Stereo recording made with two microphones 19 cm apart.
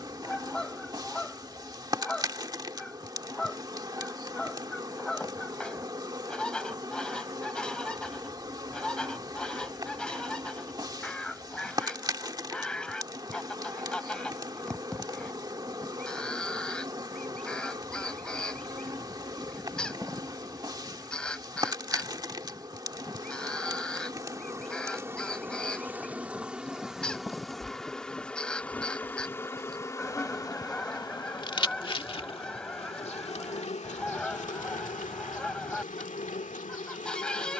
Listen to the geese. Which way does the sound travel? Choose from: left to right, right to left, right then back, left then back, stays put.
stays put.